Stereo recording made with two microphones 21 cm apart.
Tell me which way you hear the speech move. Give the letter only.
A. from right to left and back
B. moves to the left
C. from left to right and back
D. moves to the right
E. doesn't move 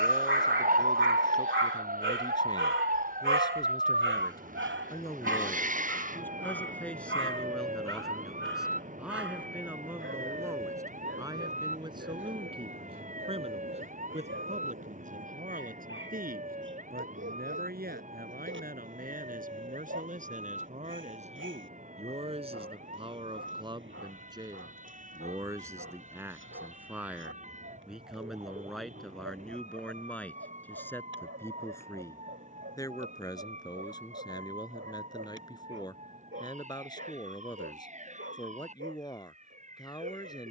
C.